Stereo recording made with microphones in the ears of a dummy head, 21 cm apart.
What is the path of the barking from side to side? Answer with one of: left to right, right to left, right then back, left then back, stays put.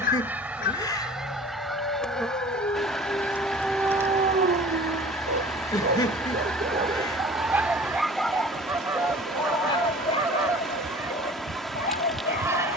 right then back.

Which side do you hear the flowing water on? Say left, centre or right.
centre.